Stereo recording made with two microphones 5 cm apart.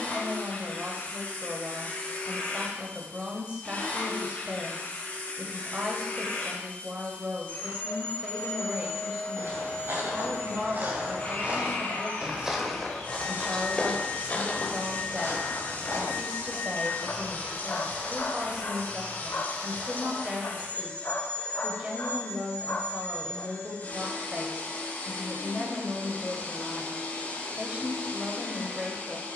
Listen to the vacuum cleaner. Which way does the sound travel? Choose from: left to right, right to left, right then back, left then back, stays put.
stays put.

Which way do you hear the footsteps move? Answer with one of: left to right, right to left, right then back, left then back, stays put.
right to left.